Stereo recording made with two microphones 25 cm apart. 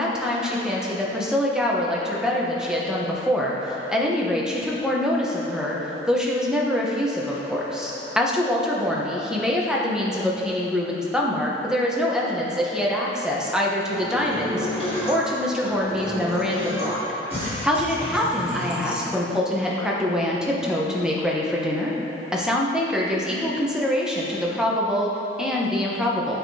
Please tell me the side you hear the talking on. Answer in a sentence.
You can hear the talking in the centre.